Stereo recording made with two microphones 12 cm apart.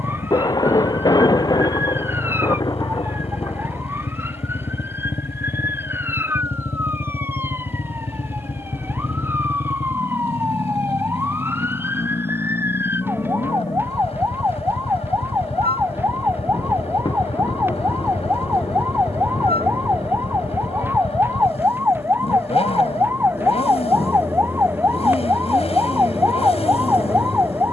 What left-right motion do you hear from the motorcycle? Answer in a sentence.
In this clip you hear the motorcycle stay in one place.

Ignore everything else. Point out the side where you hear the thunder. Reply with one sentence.
You can hear the thunder on the left.